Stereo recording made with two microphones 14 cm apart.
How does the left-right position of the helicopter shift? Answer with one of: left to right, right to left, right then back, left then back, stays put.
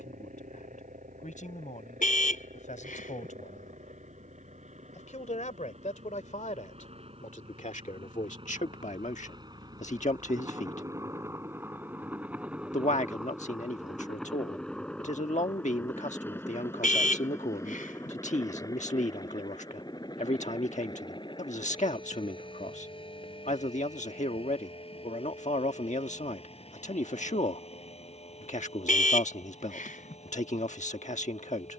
right to left.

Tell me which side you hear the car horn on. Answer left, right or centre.
left.